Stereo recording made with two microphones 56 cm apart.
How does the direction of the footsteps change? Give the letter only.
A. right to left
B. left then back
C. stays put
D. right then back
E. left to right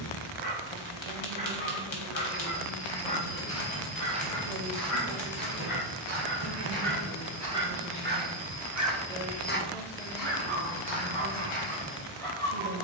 D.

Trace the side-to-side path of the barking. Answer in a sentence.
In this clip you hear the barking go from the left side to the right.